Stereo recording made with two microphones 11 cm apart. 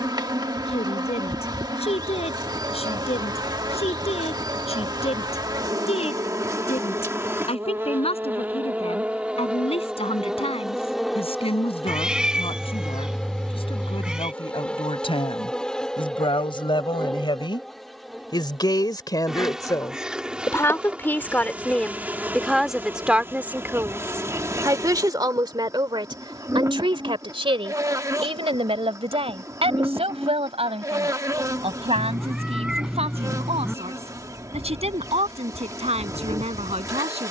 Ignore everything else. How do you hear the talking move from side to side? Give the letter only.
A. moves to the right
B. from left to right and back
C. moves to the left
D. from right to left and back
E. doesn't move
A.